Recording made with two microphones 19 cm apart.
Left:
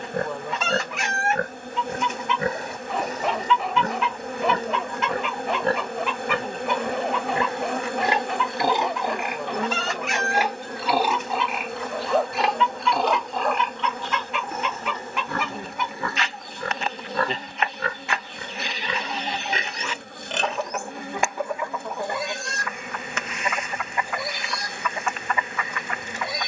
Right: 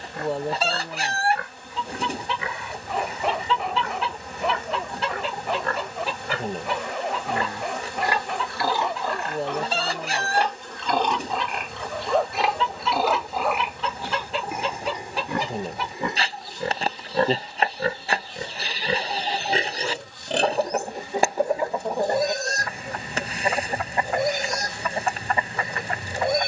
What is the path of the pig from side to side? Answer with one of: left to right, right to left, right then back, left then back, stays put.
left to right.